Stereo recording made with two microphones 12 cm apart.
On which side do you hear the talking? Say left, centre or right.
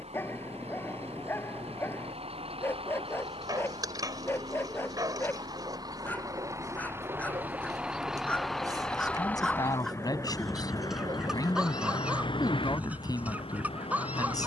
left.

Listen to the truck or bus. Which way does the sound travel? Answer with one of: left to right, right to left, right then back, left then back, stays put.
right to left.